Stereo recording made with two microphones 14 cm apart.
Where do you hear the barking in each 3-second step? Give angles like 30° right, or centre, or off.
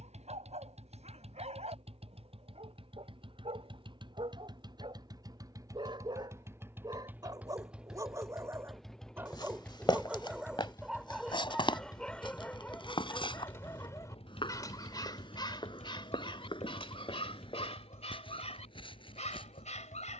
50° right, 40° right, 30° right, 10° right, 20° left, 40° left, 50° left.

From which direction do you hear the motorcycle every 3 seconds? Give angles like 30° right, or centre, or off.
50° right, 30° right, 10° right, 20° left, 40° left, 50° left, 60° left.